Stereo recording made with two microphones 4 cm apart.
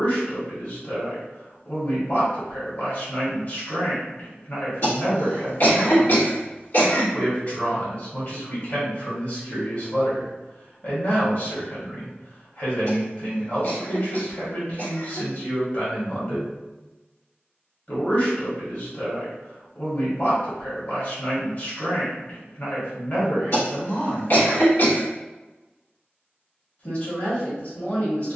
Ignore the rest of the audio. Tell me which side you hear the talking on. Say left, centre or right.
left.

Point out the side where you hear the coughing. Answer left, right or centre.
left.